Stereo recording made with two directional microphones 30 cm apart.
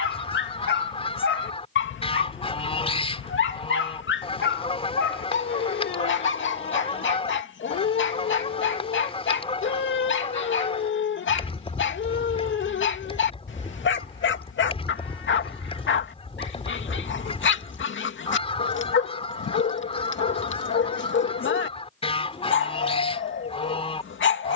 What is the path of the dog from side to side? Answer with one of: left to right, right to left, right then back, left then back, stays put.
stays put.